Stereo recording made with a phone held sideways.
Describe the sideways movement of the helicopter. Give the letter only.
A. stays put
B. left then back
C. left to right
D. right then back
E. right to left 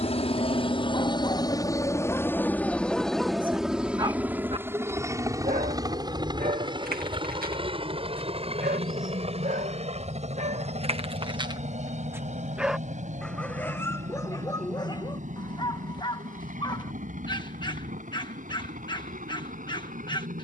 C.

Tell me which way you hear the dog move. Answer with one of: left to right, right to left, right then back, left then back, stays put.
right then back.